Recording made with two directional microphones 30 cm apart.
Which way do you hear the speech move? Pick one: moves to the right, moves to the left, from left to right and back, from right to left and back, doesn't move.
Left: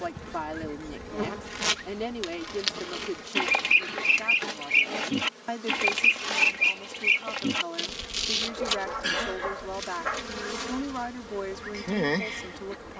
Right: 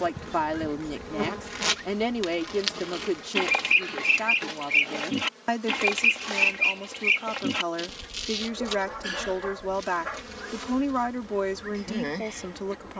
doesn't move.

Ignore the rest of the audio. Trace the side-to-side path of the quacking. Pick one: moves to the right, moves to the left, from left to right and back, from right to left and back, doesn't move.
doesn't move.